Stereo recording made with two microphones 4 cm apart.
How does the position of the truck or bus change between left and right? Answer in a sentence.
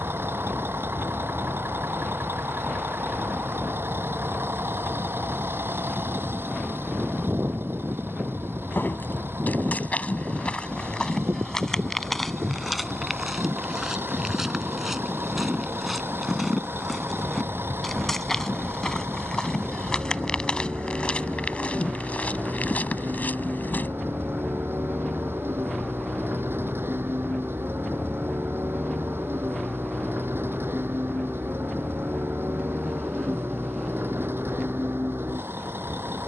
You can hear the truck or bus stay put.